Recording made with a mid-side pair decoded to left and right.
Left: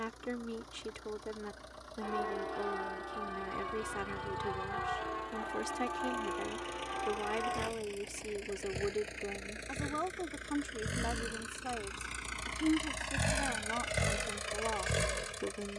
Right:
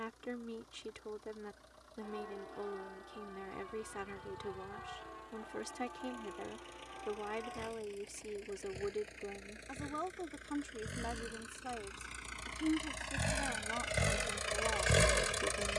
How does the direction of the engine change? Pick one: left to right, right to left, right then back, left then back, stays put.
left to right.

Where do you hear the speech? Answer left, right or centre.
left.